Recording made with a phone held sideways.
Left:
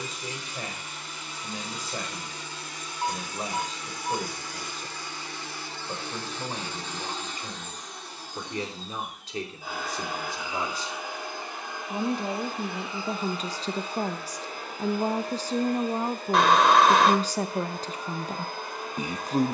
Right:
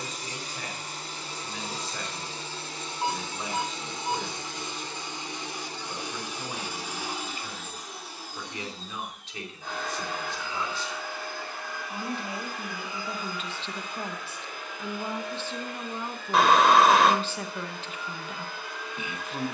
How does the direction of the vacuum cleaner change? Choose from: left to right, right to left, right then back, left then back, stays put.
right to left.